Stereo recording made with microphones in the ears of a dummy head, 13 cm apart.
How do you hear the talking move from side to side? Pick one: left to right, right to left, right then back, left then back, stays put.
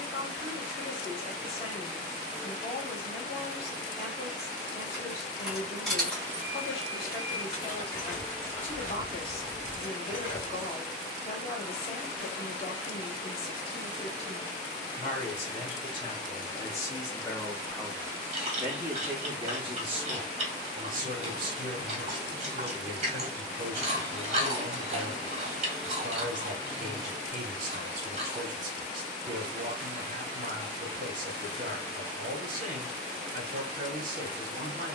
left to right.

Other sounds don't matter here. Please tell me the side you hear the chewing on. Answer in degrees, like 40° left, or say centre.
40° right.